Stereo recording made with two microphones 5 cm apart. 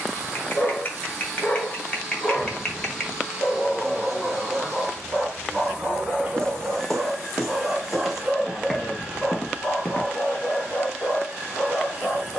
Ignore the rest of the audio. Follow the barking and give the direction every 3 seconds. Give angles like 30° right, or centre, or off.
30° left, centre, 10° right, 30° left.